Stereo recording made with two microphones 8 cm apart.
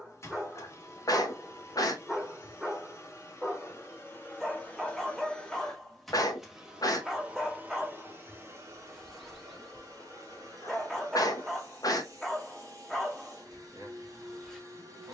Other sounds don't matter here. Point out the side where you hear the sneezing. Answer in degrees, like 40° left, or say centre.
50° left.